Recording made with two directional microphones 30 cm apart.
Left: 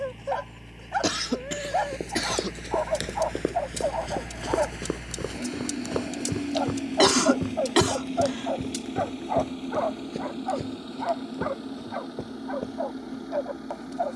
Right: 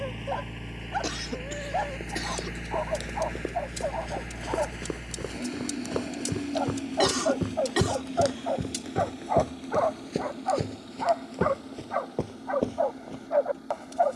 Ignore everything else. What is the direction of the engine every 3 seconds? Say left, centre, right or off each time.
right, centre, left, left, left.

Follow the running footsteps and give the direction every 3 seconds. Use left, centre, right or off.
left, left, centre, right, right.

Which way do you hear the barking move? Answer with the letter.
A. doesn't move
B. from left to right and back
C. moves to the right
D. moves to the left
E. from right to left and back
C.